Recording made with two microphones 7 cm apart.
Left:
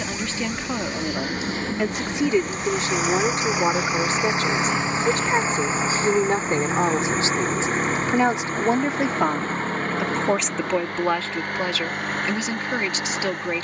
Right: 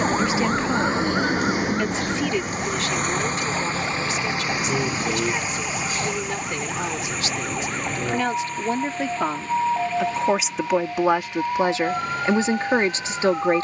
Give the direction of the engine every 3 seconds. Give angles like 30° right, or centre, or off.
20° right, 20° left, 40° left, 50° left, 50° left.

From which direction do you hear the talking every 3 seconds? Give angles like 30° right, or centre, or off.
10° left, 40° left, 30° left, 10° right, 30° right.